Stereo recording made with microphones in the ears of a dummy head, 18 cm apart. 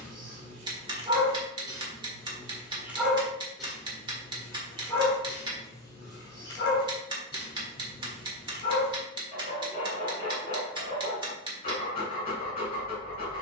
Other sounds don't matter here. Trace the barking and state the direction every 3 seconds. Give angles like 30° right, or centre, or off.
20° right, 10° left, 20° left, 30° left, 30° left.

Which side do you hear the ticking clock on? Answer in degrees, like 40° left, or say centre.
20° right.